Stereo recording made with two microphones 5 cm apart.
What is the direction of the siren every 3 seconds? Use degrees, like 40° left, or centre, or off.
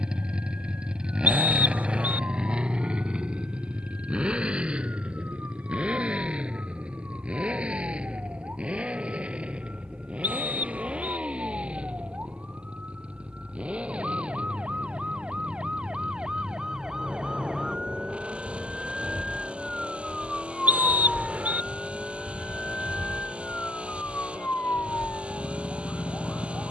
50° right, 50° right, 40° right, 40° right, 30° right, 20° right, centre, 30° left, 50° left.